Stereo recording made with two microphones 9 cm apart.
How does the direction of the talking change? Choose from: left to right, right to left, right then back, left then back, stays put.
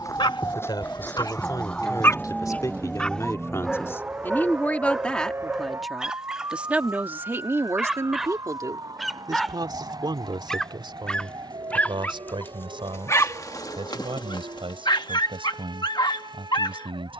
left to right.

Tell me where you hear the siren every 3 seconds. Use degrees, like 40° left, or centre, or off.
10° left, 20° right, 40° right, 50° right, 50° right, 60° right.